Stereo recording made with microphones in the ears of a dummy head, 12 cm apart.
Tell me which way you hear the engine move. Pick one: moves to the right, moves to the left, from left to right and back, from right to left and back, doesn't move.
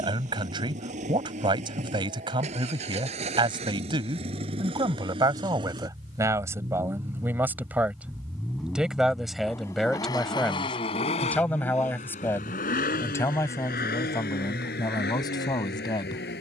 moves to the left.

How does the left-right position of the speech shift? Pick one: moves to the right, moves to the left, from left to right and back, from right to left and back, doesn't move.
moves to the left.